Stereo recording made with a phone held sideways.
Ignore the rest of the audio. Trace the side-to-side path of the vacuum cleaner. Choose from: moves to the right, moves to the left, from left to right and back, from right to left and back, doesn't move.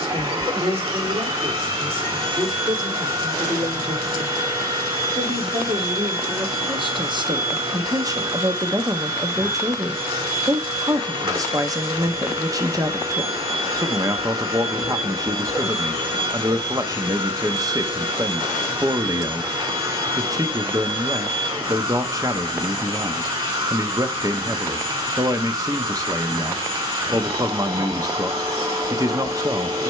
doesn't move.